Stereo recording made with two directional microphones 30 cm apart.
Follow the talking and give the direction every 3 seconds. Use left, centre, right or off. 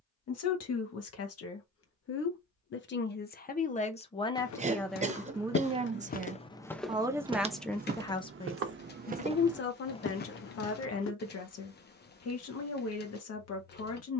left, centre, centre, left, left.